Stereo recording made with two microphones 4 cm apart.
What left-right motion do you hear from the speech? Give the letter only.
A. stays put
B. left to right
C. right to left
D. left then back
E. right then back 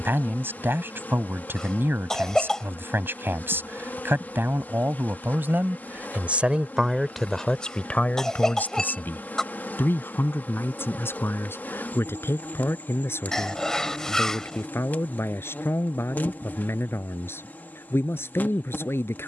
C.